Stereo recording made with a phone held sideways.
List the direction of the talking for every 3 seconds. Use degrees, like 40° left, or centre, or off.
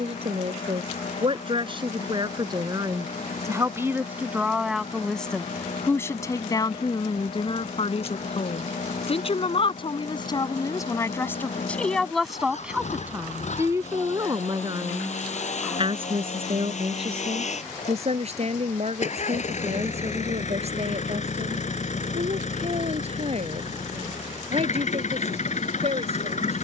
40° right, 10° right, 40° left, 30° left, 20° right, 50° right, 50° right, 50° right, 50° right.